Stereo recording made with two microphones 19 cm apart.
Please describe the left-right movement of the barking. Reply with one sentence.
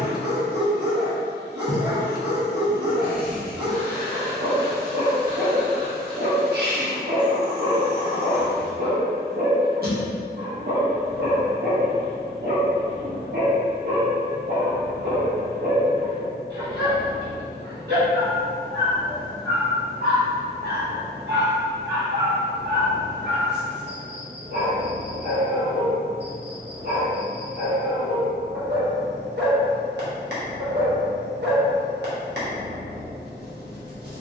You can hear the barking stay in one place.